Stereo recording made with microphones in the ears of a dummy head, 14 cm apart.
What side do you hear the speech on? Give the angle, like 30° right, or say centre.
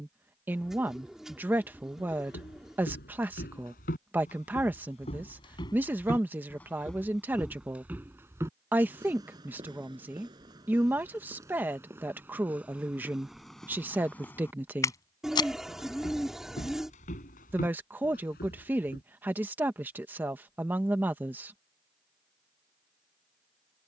10° right.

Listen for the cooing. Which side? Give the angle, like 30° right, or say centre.
centre.